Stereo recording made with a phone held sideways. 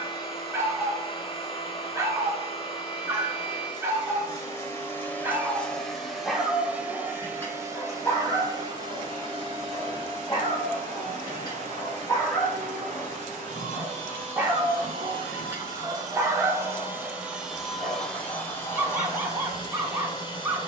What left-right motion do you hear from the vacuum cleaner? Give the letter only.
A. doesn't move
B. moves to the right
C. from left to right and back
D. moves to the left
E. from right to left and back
C.